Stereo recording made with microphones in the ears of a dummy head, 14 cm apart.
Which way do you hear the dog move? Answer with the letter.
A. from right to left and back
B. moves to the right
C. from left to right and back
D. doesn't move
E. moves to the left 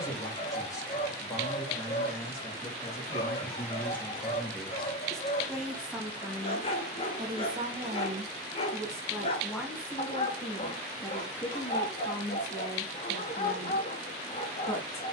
D.